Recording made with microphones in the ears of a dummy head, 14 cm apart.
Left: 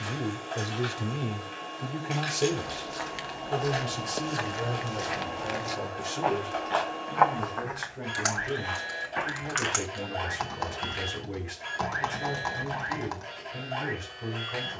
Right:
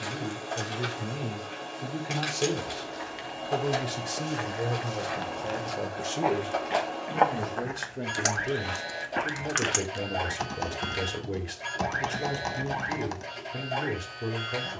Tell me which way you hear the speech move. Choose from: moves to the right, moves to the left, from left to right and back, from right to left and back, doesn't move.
moves to the right.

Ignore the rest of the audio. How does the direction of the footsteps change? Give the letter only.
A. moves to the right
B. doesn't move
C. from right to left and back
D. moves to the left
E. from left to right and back
A.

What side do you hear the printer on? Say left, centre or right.
right.